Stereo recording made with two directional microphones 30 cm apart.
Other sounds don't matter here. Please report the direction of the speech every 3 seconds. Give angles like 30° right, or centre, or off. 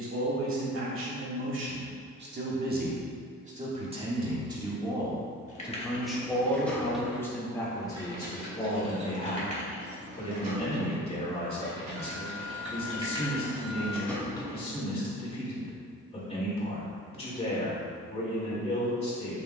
40° right, 10° right, 10° left, 20° left, 20° left, 20° left, 20° left.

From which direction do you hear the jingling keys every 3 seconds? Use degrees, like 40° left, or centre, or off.
off, 20° left, 10° right, 30° right, 10° right, off, off.